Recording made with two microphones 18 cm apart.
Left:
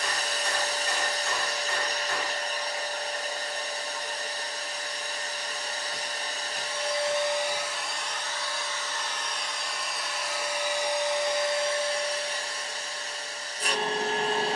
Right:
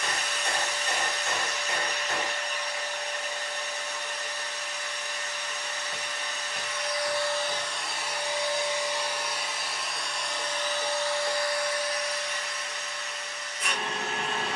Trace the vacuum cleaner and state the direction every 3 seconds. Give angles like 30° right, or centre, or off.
40° left, 40° left, 10° left, 10° left, 30° left.